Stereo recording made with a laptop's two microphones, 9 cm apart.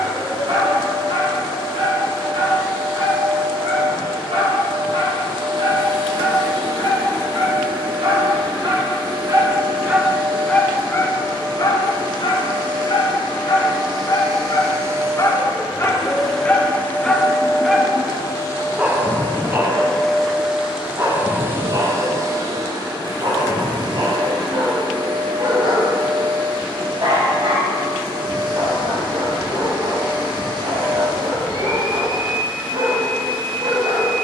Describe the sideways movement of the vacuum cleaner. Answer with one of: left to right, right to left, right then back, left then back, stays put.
left then back.